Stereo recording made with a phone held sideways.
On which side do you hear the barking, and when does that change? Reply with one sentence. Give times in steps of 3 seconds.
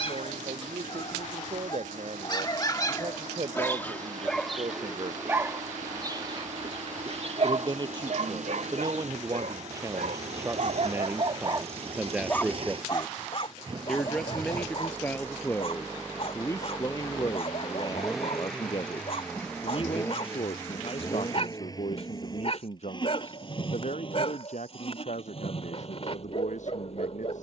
In this clip you hear the barking on the left from 0 s, in the centre from 3 s, on the right from 6 s and on the left from 12 s.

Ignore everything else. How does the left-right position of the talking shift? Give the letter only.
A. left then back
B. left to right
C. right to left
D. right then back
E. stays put
C.